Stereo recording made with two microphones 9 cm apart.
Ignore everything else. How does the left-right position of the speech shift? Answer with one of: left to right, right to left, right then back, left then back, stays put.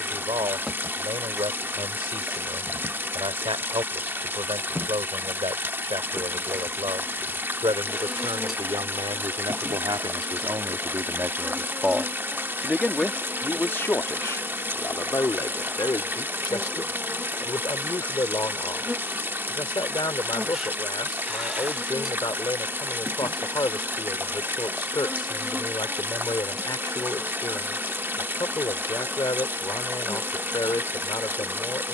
right to left.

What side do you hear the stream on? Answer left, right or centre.
right.